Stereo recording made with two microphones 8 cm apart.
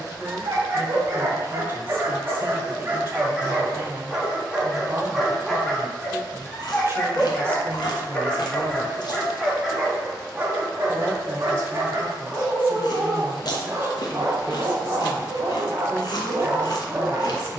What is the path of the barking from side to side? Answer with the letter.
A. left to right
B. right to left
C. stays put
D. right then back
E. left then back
E.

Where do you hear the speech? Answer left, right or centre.
right.